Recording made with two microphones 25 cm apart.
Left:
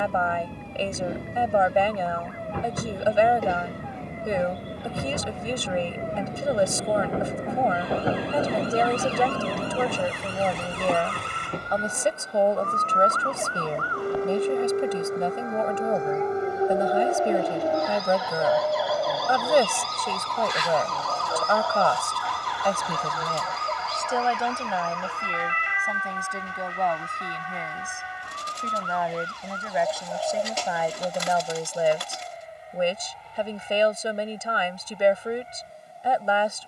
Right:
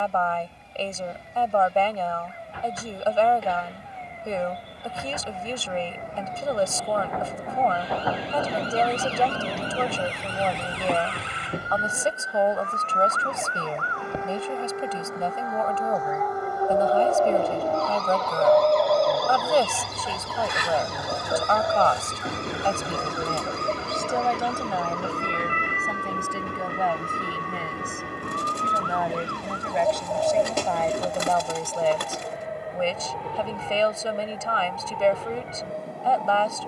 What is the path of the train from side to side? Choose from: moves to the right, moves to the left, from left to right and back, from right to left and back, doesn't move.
moves to the right.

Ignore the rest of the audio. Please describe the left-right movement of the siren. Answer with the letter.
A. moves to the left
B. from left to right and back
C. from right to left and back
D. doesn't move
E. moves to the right
E.